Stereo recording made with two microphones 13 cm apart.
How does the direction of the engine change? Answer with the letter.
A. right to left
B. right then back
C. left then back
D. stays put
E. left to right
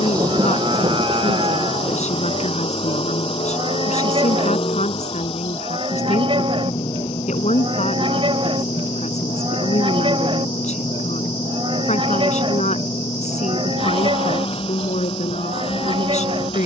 D.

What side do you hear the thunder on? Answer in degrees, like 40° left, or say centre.
30° right.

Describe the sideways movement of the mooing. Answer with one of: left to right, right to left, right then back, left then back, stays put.
stays put.